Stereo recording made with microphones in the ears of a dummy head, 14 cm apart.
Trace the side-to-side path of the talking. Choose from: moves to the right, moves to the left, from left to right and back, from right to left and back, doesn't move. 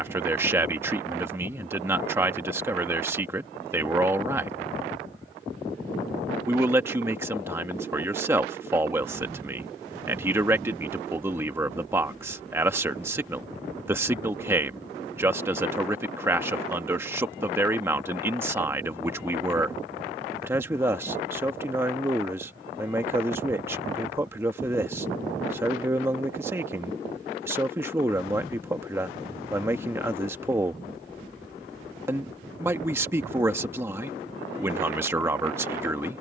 doesn't move.